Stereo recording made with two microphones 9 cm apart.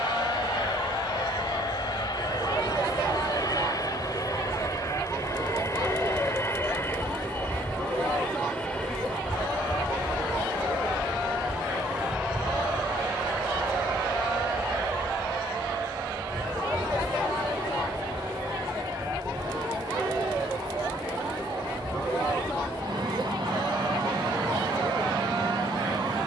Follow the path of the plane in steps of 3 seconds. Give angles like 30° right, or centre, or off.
60° left, 40° left, 20° left, centre, 20° right, 30° right, 40° right, 50° right, 50° right.